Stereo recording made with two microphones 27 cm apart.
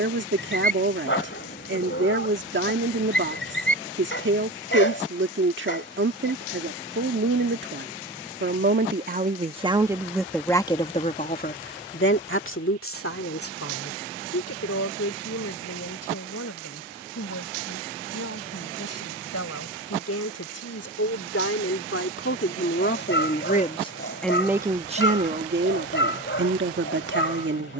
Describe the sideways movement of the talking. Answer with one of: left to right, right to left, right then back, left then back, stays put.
left then back.